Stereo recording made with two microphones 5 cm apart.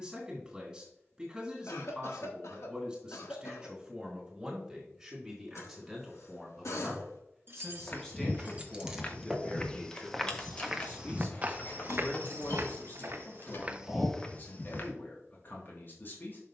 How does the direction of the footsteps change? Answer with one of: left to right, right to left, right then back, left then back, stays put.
right then back.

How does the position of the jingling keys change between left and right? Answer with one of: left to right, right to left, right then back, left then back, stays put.
right to left.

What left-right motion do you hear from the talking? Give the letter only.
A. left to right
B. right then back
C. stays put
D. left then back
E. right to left
E.